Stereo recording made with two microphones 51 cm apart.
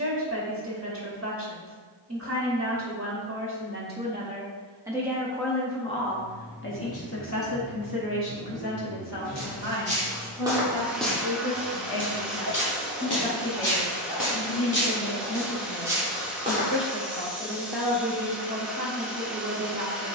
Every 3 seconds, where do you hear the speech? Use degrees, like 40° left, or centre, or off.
30° right, 10° right, 40° left, 60° left, 70° left, 30° left, 20° right.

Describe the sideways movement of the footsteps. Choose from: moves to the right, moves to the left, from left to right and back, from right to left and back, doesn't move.
from right to left and back.